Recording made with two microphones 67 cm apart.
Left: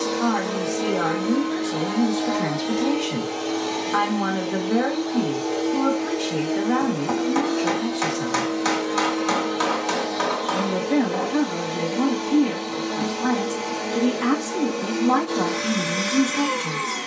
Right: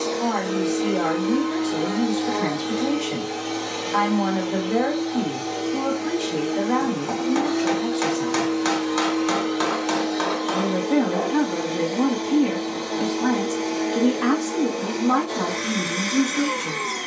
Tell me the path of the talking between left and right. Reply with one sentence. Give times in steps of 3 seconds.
You can hear the talking on the left from 0 s, in the centre from 9 s and on the left from 15 s.